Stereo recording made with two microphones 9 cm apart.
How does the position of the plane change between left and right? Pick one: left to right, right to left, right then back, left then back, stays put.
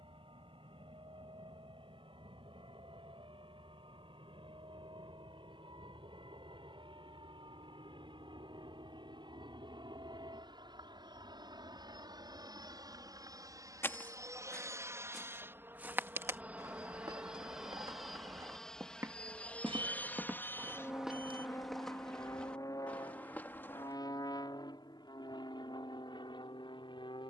right to left.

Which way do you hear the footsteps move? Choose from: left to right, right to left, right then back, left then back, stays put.
right then back.